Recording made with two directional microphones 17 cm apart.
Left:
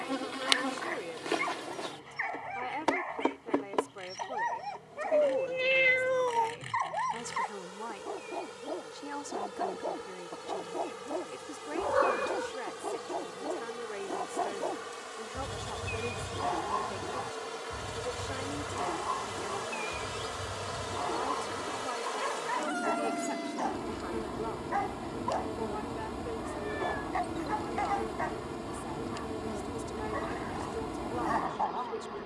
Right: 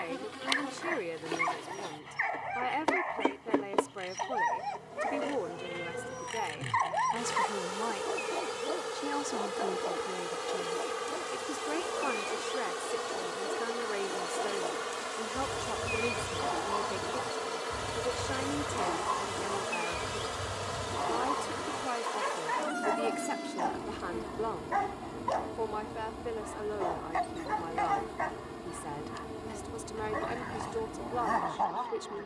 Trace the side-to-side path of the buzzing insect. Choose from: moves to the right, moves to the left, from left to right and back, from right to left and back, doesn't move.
from left to right and back.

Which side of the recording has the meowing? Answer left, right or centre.
left.